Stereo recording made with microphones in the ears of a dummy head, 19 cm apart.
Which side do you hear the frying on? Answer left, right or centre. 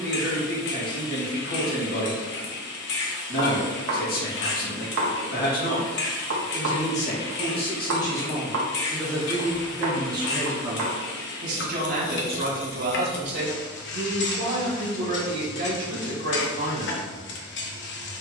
left.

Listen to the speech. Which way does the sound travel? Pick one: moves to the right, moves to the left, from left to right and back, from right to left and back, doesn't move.
moves to the right.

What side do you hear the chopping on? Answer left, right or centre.
right.